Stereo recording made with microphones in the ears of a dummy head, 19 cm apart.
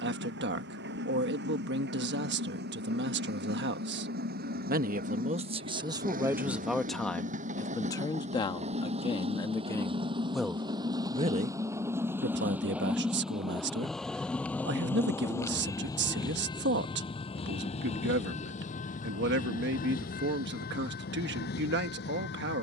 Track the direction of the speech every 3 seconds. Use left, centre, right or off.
right, right, centre, centre, right, right, right, right.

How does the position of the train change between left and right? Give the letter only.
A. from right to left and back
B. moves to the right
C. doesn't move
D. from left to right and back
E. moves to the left
E.